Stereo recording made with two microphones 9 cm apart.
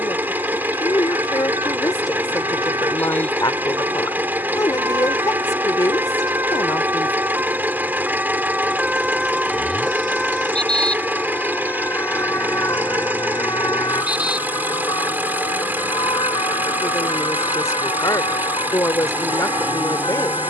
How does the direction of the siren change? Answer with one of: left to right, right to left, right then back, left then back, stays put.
right to left.